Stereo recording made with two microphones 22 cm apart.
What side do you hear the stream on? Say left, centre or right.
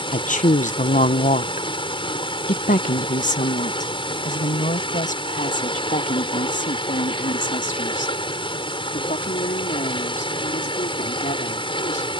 left.